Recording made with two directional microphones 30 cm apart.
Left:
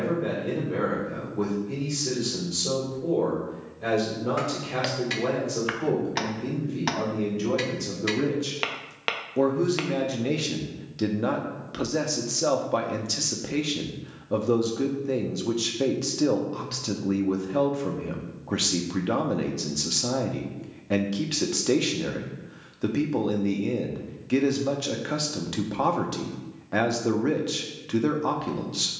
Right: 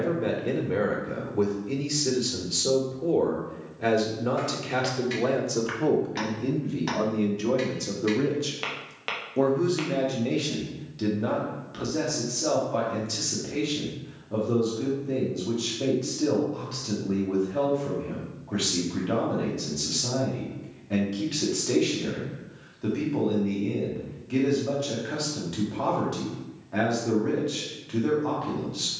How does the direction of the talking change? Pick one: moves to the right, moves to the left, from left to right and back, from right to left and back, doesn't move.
moves to the left.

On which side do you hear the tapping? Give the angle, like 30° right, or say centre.
30° left.